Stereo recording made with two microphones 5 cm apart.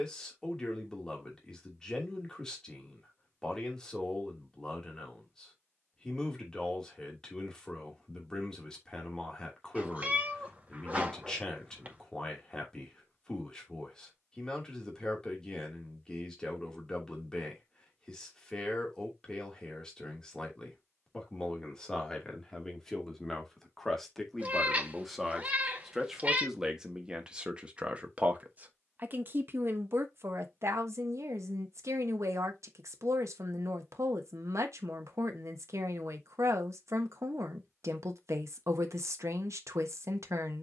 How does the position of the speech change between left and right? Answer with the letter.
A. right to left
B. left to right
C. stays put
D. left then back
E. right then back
B.